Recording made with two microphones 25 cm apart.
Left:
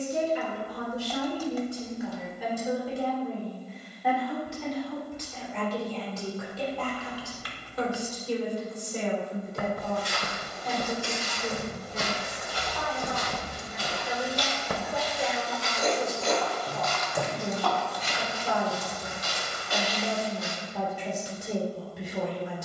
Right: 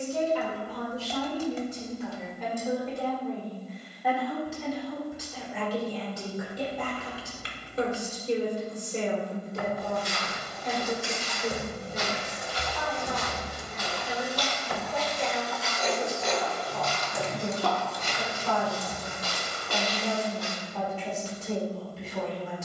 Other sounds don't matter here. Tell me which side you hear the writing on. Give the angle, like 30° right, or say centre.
50° left.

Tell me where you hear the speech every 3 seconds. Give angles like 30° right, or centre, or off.
10° left, centre, 20° right, 20° right, 10° left, 20° left, 20° left, 20° left.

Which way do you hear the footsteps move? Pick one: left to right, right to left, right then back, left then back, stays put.
left to right.